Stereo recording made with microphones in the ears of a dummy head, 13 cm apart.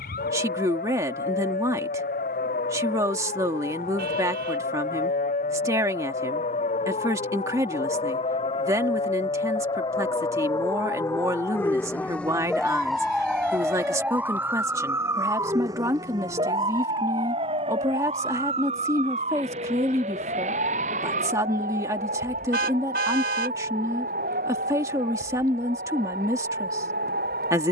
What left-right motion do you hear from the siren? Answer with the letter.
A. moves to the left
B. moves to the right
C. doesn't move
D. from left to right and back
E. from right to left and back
B.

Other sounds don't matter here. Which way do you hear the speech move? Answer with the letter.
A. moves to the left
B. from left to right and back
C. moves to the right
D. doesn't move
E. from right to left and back
D.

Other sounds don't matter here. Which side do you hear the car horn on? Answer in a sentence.
In this clip you hear the car horn on the right.